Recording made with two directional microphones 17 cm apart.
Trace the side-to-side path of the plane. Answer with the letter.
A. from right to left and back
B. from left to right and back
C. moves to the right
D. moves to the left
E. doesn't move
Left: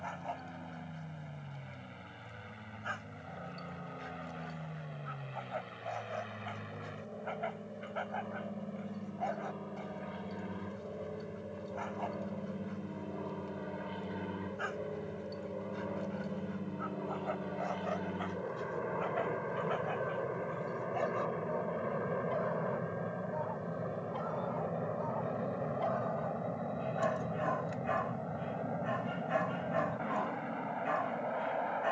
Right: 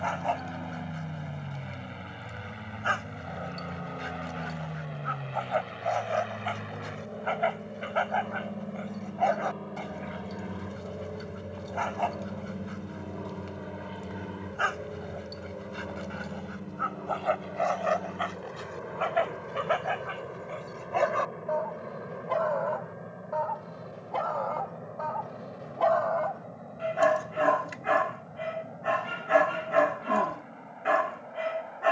D.